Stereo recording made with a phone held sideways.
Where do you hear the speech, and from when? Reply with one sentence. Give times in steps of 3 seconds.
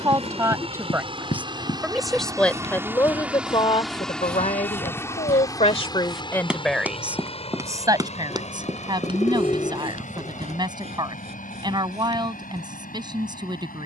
You can hear the speech in the centre from 0 s, on the left from 3 s, in the centre from 6 s and on the right from 9 s.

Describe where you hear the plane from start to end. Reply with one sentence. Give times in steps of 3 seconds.
You can hear the plane on the right from 0 s, in the centre from 3 s and on the left from 6 s.